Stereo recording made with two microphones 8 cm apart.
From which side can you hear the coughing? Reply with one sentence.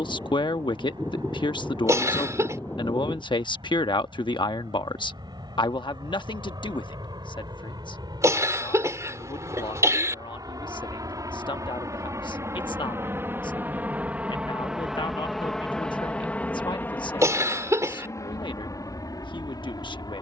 You can hear the coughing on the right.